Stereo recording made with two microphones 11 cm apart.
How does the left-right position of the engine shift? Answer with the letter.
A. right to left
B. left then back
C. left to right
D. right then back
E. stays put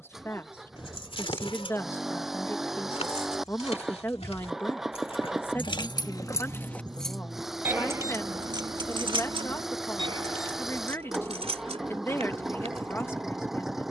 E.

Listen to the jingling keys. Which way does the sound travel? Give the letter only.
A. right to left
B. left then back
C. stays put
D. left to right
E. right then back
D.